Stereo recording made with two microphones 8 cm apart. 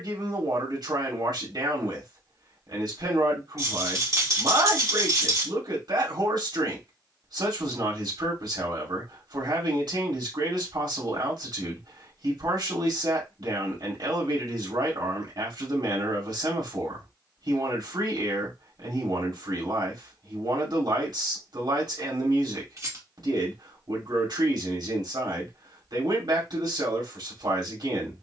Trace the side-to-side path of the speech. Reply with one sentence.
In this clip you hear the speech stay put.